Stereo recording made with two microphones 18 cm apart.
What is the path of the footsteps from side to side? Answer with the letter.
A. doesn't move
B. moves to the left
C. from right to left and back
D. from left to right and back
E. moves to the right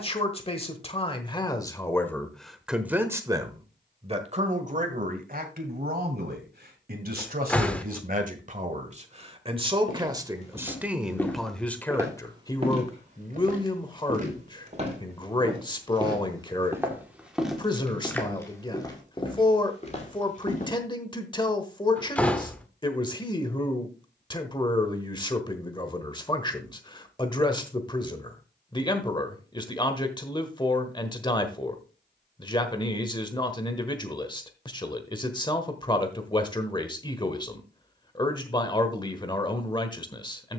D.